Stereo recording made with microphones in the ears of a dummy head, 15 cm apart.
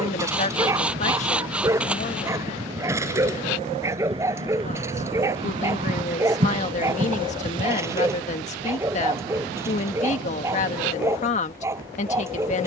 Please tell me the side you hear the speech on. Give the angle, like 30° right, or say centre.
40° left.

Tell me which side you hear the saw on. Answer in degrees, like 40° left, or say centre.
10° right.